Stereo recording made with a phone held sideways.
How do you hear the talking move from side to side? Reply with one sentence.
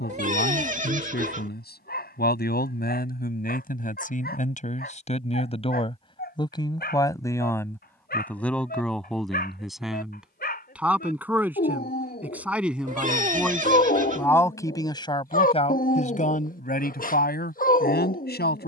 In this clip you hear the talking move from left to right and back again.